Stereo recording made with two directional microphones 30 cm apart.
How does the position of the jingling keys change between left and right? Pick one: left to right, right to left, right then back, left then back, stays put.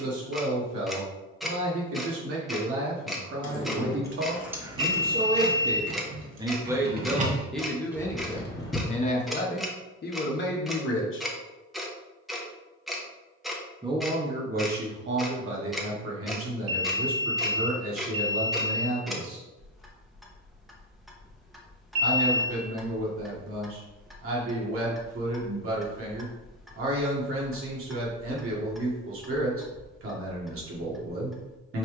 right then back.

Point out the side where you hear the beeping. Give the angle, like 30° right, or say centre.
60° right.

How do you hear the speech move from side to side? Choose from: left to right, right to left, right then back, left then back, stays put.
left then back.